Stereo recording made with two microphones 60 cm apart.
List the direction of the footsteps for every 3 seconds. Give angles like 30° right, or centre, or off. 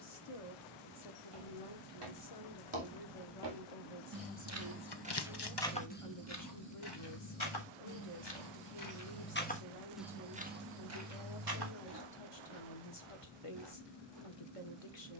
60° right, 20° right, 40° left, 10° right, 60° right.